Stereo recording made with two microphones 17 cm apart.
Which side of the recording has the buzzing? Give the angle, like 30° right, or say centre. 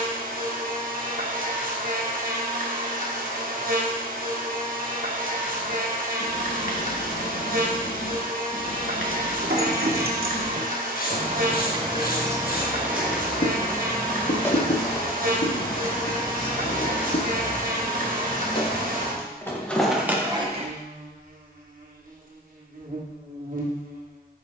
60° right.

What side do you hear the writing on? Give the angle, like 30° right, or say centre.
60° left.